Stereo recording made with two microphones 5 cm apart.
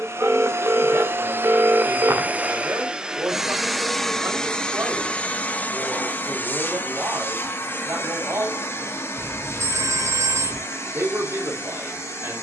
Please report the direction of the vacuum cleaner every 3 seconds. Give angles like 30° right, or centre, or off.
40° right, 10° left, 40° left, 60° left.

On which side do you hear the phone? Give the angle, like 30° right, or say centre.
70° right.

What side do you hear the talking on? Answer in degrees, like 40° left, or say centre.
60° right.